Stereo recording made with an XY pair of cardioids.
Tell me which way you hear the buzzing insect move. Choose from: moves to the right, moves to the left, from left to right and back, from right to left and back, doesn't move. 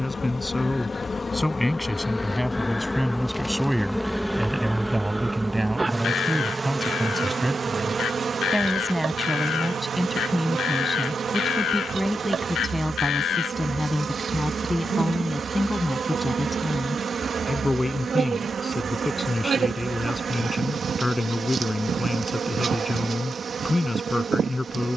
moves to the right.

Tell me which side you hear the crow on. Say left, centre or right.
left.